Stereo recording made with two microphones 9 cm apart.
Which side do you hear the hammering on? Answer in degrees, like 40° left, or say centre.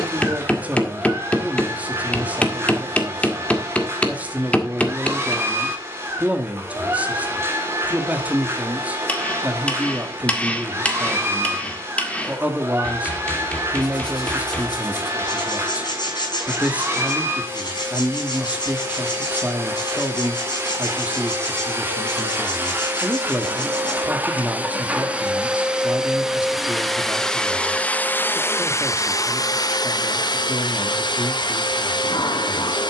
20° left.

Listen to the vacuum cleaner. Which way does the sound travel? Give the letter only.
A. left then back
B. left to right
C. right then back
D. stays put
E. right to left
E.